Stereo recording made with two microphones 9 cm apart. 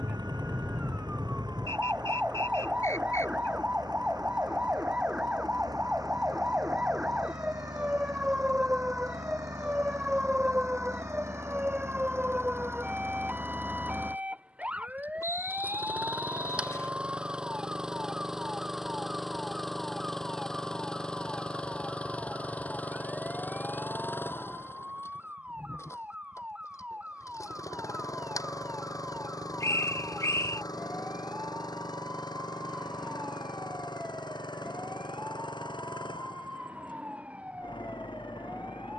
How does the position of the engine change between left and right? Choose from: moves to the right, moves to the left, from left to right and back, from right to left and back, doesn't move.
moves to the left.